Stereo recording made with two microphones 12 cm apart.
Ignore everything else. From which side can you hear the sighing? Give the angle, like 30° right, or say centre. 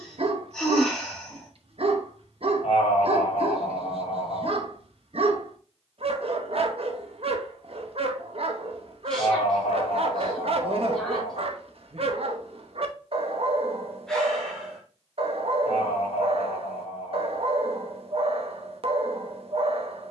10° left.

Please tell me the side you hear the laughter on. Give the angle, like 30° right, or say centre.
70° left.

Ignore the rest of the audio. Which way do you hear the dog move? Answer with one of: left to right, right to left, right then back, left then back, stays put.
stays put.